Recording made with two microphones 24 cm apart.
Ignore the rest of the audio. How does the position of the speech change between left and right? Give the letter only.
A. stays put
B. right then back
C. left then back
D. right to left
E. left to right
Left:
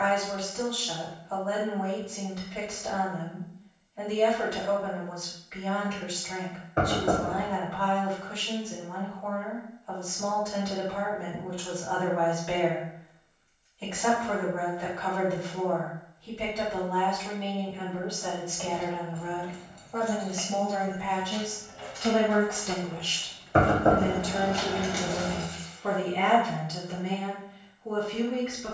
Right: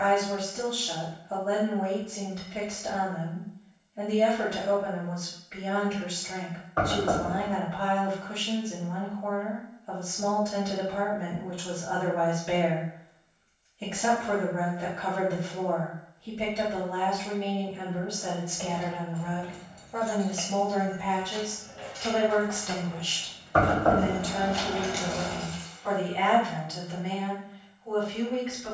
D.